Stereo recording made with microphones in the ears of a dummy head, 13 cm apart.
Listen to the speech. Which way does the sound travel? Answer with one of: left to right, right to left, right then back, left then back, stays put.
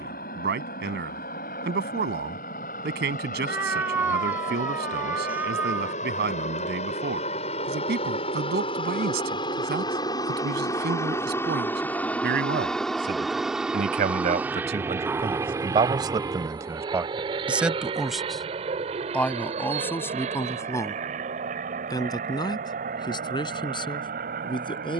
right to left.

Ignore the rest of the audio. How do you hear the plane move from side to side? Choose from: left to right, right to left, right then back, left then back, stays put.
left to right.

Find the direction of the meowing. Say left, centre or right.
centre.